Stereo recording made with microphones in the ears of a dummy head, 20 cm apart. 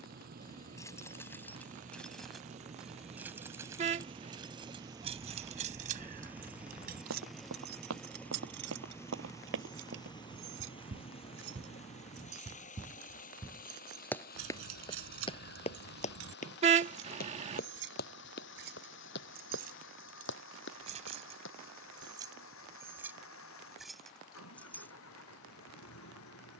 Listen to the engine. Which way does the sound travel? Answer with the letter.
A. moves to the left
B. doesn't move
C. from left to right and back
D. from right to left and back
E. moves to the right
A.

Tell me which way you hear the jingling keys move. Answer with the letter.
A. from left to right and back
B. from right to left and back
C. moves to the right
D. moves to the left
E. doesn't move
A.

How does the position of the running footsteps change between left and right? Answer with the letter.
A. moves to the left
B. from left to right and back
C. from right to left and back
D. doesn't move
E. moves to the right
A.